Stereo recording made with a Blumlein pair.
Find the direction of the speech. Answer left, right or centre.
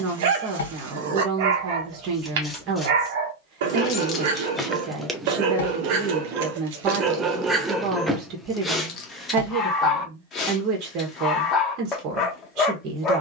right.